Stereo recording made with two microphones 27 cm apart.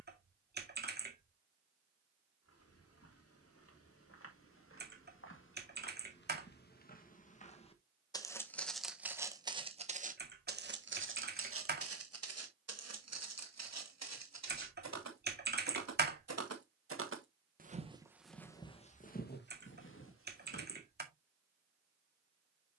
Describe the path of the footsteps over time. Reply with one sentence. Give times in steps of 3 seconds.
In this clip you hear the footsteps on the left from 0 s, on the right from 9 s, on the left from 18 s and not at all from 21 s.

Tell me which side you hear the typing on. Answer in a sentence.
In this clip you hear the typing on the right.